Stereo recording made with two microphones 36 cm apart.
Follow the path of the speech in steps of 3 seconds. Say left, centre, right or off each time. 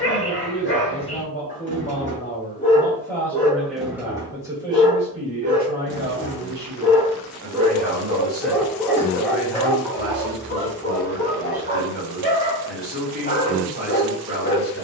left, centre, right, right, right.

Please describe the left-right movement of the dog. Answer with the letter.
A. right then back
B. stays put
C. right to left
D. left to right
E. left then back
A.